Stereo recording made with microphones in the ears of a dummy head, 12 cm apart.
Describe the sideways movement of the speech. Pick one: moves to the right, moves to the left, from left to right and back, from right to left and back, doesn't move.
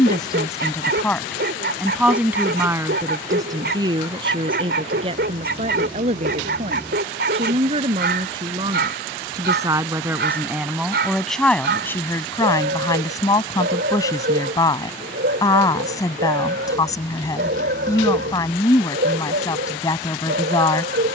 from left to right and back.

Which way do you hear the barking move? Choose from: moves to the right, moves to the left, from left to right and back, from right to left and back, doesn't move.
doesn't move.